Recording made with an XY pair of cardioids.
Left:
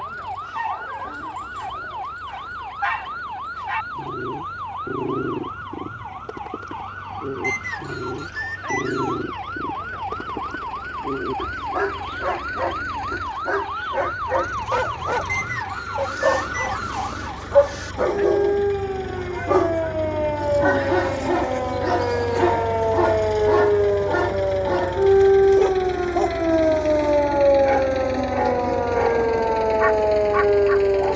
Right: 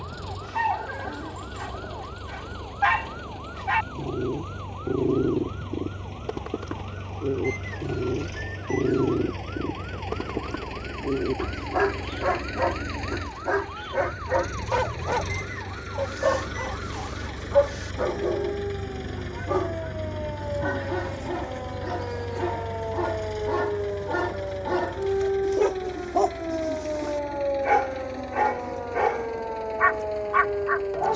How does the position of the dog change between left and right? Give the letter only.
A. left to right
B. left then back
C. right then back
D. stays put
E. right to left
B.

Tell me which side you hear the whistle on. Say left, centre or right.
left.